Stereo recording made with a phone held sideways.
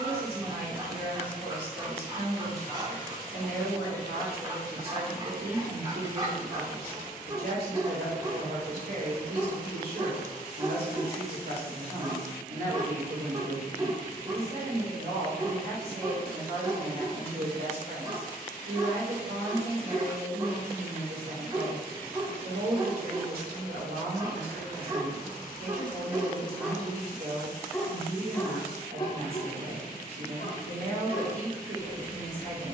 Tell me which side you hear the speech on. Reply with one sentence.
In this clip you hear the speech on the right.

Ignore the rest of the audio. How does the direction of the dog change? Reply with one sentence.
In this clip you hear the dog move to the left.